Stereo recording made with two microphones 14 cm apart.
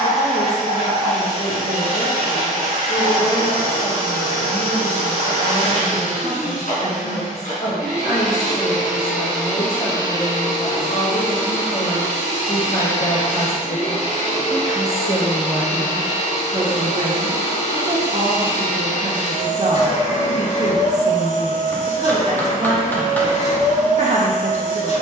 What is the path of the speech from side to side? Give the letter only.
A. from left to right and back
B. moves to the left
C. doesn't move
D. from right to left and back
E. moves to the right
E.